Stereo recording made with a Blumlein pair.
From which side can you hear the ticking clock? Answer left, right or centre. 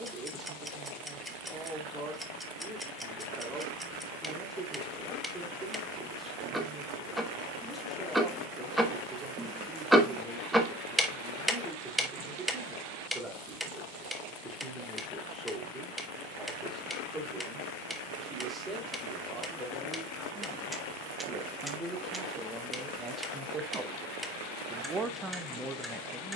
centre.